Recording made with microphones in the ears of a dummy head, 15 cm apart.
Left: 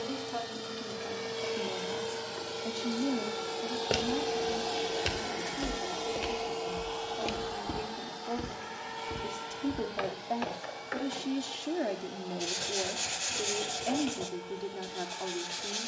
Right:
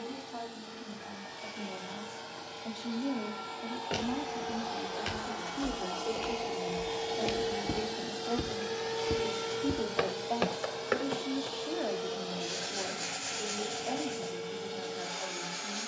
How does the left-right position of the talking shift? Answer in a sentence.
In this clip you hear the talking go right and come back.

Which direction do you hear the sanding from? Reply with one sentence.
In this clip you hear the sanding on the left.